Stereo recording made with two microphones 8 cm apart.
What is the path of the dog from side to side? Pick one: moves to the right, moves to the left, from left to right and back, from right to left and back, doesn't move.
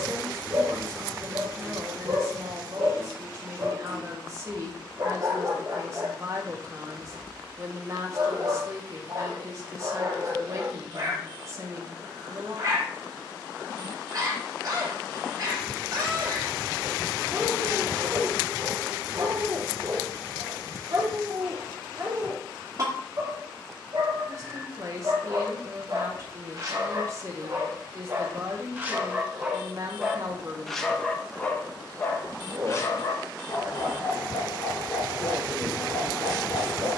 moves to the left.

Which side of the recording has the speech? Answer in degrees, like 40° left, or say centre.
40° right.